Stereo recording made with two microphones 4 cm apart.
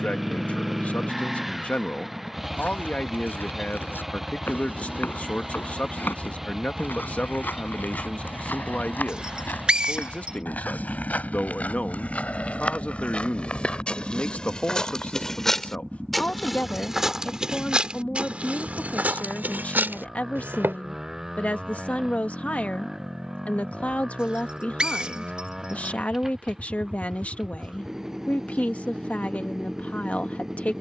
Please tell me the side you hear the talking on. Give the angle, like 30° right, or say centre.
40° left.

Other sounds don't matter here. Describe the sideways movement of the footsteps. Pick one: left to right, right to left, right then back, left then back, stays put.
left to right.